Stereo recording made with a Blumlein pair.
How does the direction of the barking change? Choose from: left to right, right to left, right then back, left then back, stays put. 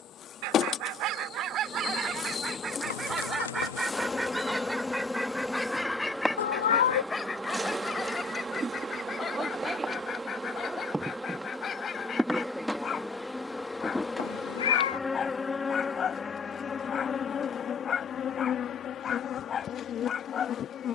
right to left.